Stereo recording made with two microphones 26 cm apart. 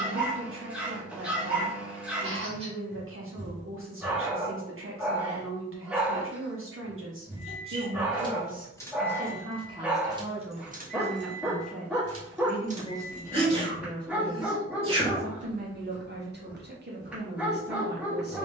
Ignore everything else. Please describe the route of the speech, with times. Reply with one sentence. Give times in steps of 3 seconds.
You can hear the speech on the right from 0 s, in the centre from 9 s and on the right from 15 s.